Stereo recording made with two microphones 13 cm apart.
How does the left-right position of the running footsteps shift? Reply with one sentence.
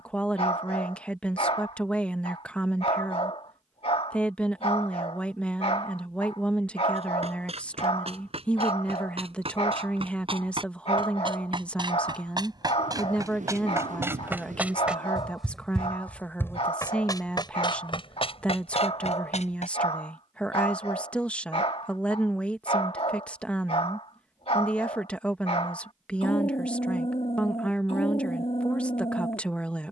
You can hear the running footsteps move to the left.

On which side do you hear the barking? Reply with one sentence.
You can hear the barking on the left.